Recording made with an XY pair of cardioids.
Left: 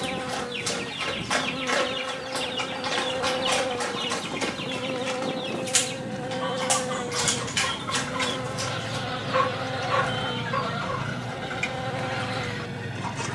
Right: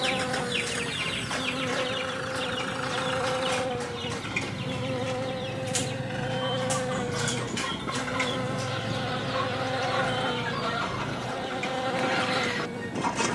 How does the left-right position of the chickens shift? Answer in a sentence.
In this clip you hear the chickens move from right to left and back again.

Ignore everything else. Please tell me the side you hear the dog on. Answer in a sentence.
In this clip you hear the dog on the left.